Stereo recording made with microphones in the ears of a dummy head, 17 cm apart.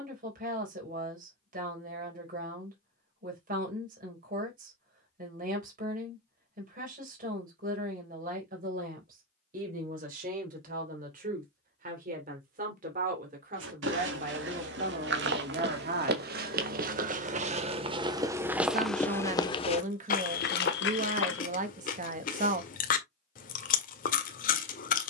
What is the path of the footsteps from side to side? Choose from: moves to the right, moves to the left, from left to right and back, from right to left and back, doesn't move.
moves to the left.